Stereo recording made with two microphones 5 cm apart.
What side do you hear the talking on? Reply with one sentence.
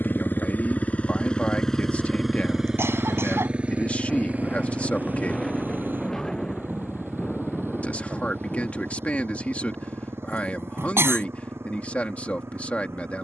In this clip you hear the talking on the left.